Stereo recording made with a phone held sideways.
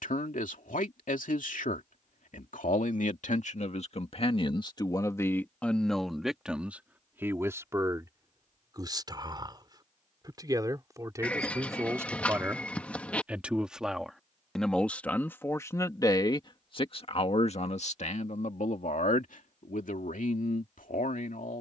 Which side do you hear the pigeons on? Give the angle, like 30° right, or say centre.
10° left.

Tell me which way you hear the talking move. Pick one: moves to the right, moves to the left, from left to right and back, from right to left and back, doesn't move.
from left to right and back.